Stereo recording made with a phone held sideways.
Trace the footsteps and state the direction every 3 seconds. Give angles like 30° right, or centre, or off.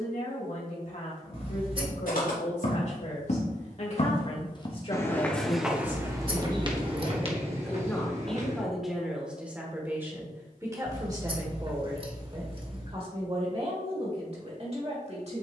70° left, 30° left, 40° right, off, off.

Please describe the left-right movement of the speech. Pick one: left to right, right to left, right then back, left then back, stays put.
left to right.